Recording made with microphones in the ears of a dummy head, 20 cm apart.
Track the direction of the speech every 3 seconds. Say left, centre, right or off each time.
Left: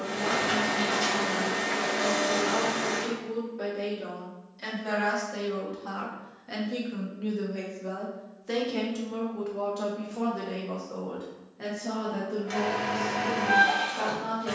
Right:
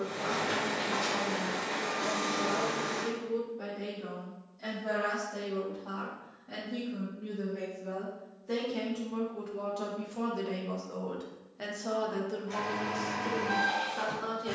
left, left, left, centre, right.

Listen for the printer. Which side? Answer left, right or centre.
left.